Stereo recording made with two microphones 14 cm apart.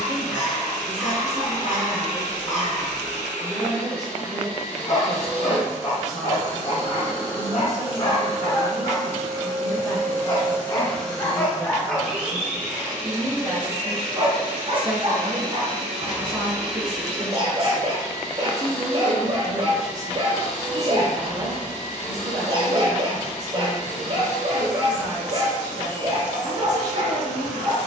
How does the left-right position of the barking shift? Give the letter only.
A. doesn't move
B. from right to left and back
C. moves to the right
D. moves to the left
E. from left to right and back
C.